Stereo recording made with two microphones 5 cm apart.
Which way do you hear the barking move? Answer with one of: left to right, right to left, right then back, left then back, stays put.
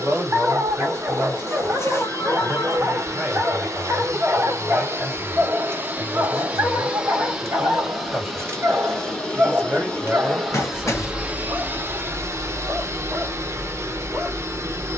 stays put.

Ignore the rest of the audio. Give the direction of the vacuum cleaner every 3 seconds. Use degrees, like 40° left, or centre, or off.
60° right, 50° right, 10° right, 10° right, 50° right.